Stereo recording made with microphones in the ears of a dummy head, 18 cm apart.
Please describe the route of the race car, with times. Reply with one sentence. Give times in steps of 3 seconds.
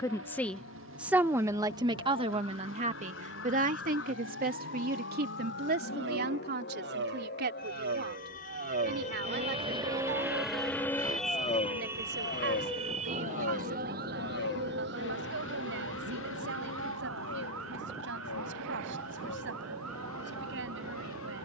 In this clip you hear the race car on the right from 0 s, in the centre from 9 s and on the left from 12 s.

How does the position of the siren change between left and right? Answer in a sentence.
You can hear the siren travel towards the right.